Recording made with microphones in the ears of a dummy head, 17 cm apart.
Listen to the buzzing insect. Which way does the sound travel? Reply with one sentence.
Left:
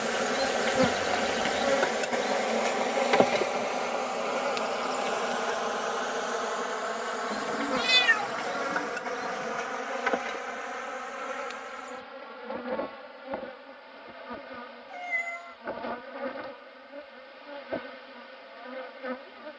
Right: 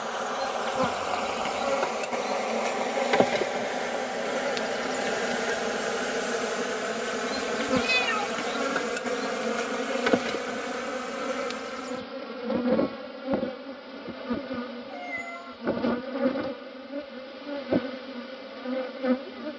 You can hear the buzzing insect move from left to right.